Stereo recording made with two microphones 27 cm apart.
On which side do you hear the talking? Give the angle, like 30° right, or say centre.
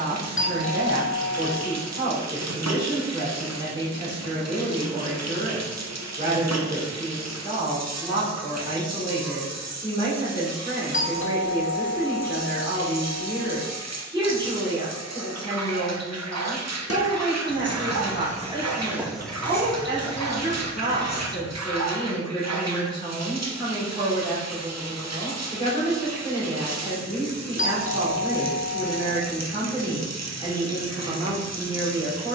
20° right.